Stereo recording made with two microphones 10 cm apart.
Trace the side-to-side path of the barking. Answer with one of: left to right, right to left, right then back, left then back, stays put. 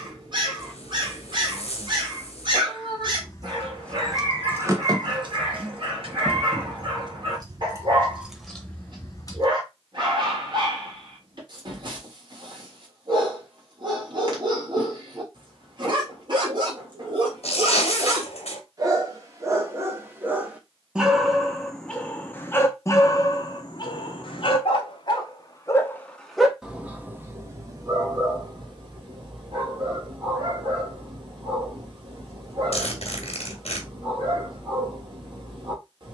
left then back.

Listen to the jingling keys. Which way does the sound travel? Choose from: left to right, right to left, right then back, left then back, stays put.
right then back.